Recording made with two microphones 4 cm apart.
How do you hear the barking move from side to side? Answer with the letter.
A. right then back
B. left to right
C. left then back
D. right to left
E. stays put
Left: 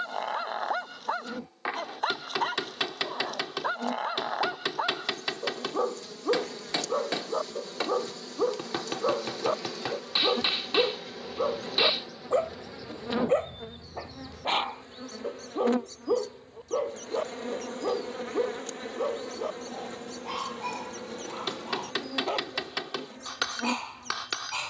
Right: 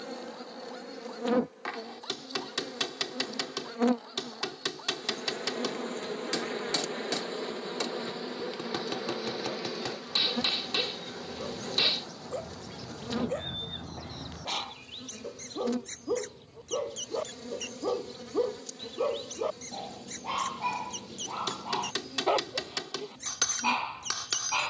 B.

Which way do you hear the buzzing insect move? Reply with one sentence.
In this clip you hear the buzzing insect go from the right side to the left.